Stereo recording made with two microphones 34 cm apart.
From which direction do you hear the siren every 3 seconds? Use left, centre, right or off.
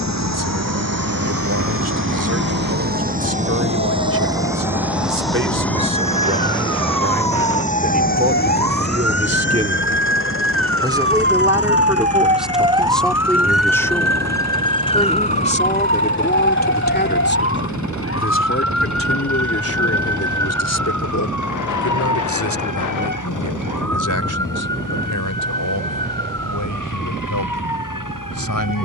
right, right, right, right, centre, left, left, left, left, left.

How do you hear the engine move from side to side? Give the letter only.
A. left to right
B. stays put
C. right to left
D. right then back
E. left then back
C.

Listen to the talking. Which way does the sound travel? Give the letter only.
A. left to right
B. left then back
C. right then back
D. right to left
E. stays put
D.